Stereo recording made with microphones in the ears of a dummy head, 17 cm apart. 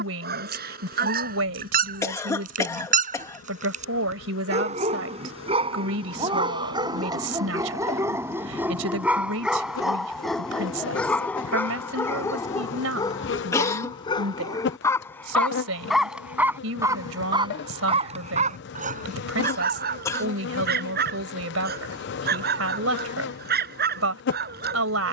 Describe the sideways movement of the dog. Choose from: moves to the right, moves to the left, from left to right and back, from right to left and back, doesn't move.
from right to left and back.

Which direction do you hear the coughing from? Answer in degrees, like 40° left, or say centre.
20° left.